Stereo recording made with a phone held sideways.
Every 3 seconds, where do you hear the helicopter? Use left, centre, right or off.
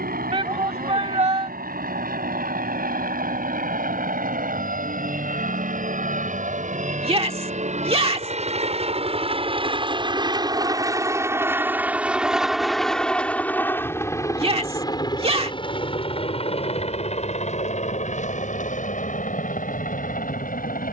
right, right, right, right, centre, left, left.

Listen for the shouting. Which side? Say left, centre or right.
right.